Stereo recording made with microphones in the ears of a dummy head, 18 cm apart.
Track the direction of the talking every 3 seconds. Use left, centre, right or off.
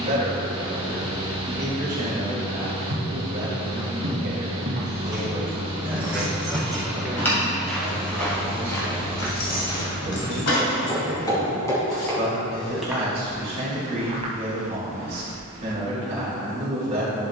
right, right, centre, right, right, right.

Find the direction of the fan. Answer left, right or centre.
right.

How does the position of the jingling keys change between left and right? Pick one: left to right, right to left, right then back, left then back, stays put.
right to left.